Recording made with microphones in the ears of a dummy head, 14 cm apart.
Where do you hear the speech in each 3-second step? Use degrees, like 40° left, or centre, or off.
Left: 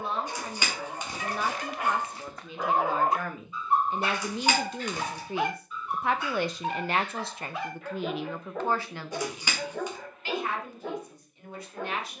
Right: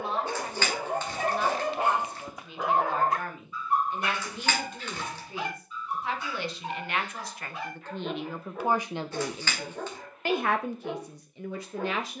70° left, 60° left, 20° left, 40° right.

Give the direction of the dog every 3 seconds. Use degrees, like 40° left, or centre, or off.
30° right, 30° left, 50° left, 60° left.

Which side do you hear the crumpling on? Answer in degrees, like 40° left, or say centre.
10° left.